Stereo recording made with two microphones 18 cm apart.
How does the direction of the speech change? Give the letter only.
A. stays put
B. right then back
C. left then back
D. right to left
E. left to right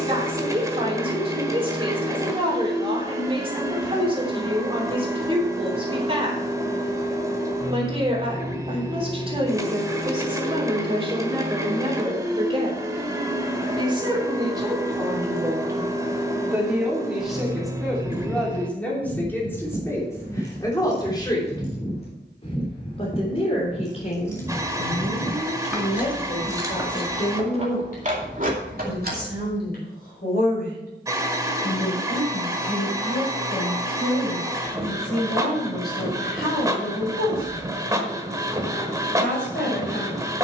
D.